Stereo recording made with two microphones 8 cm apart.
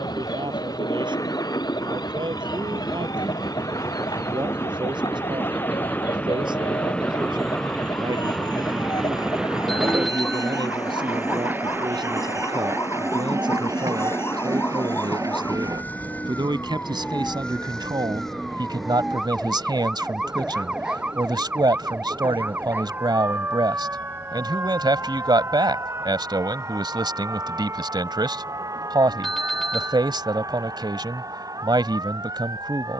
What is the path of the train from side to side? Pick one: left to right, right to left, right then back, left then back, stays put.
left to right.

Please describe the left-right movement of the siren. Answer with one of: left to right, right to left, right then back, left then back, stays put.
left to right.